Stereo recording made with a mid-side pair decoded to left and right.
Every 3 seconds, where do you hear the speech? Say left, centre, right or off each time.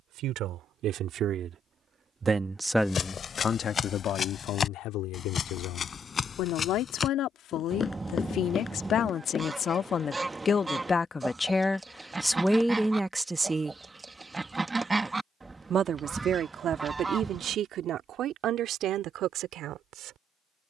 right, left, left, left, centre, right, right.